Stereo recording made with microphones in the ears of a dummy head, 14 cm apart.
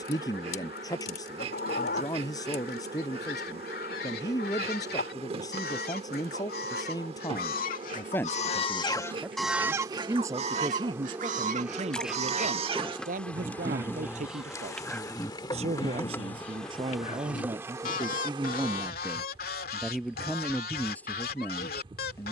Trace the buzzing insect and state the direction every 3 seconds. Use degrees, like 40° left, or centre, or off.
40° right, 40° right, 40° right, 20° right, 10° left, 10° left, 30° right, 30° right.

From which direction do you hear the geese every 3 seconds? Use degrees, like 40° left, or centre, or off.
70° left, 70° left, 60° left, 30° right, 20° right, 40° left, 60° left, 70° left.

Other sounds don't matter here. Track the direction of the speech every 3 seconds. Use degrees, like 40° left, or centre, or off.
20° left, 20° left, 20° left, 30° right, 50° right, 30° right, centre, 10° left.